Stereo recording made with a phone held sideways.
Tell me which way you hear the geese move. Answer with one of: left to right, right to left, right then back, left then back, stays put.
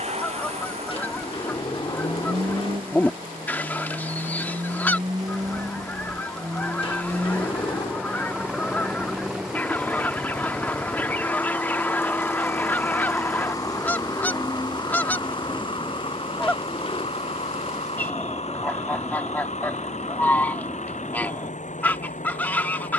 stays put.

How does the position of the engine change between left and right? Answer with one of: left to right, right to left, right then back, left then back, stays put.
right to left.